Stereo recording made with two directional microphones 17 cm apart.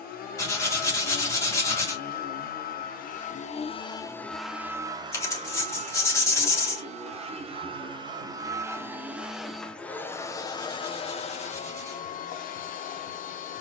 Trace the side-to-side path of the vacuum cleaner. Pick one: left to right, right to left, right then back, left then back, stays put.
right then back.